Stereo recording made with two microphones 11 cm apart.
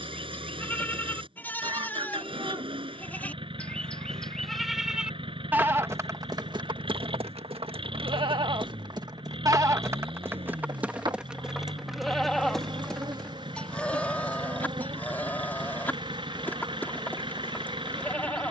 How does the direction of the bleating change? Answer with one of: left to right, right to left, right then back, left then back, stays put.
right then back.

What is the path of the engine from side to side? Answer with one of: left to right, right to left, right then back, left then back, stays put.
stays put.